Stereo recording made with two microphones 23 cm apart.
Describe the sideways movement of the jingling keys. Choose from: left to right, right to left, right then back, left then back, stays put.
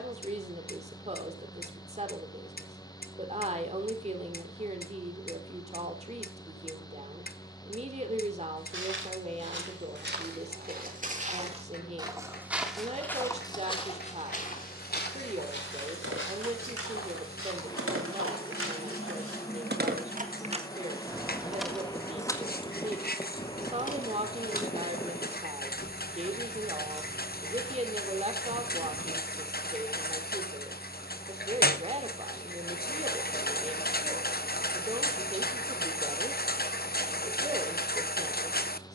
right to left.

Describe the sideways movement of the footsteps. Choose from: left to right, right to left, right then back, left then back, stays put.
right to left.